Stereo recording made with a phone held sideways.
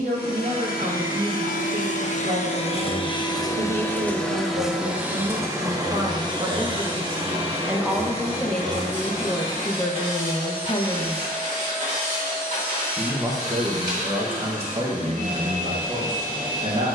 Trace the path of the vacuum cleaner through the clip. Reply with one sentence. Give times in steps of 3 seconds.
In this clip you hear the vacuum cleaner on the left from 0 s, in the centre from 3 s and on the right from 6 s.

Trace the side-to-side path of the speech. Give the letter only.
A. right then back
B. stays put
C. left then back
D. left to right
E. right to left
C.